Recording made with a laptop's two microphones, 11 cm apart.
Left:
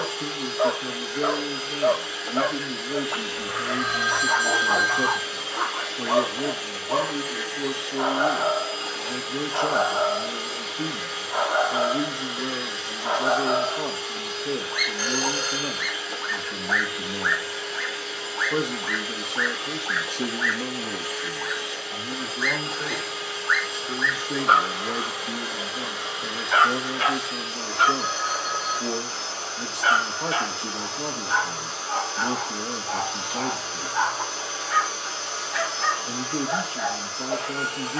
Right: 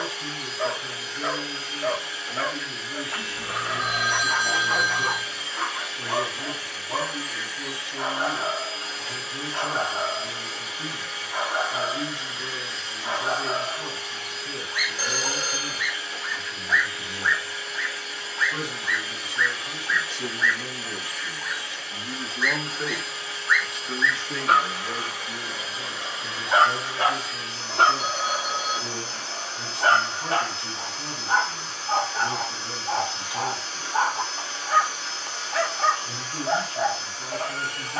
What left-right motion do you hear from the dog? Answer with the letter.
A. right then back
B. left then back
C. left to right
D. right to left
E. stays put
C.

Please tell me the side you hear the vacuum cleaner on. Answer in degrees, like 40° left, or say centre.
80° left.